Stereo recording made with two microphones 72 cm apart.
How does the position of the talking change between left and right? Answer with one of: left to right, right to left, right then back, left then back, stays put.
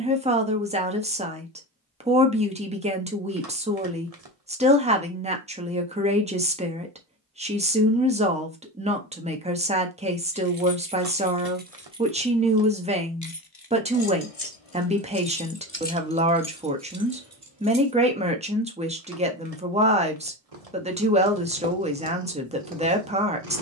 stays put.